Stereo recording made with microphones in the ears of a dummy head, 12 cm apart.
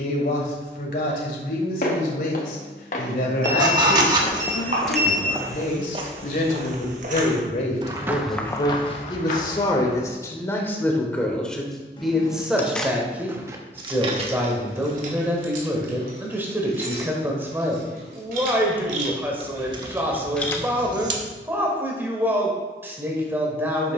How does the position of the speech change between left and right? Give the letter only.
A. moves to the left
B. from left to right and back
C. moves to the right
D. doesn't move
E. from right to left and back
C.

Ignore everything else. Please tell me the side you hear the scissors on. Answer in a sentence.
You can hear the scissors on the right.